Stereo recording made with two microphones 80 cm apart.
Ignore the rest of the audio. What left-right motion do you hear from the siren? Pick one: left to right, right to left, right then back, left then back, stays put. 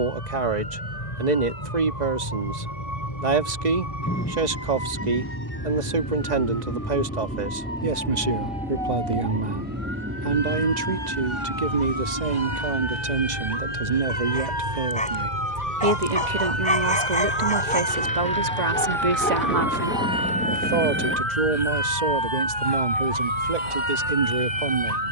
left to right.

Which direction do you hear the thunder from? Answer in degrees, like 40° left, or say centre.
10° left.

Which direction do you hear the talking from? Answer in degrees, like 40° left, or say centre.
60° right.